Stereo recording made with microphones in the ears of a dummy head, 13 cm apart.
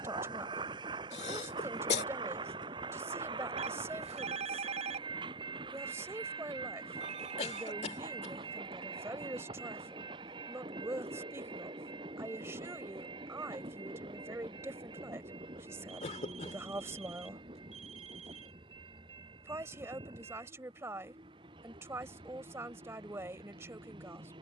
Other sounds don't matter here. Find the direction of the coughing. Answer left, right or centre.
left.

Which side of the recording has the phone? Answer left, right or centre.
right.